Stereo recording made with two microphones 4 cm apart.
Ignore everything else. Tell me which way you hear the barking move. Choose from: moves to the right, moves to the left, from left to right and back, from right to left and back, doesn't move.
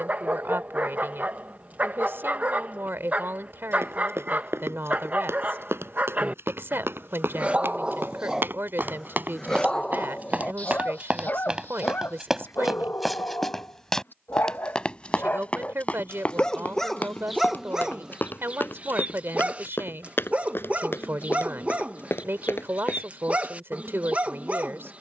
from right to left and back.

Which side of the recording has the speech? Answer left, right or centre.
right.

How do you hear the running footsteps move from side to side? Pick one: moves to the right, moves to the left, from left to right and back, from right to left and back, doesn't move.
moves to the left.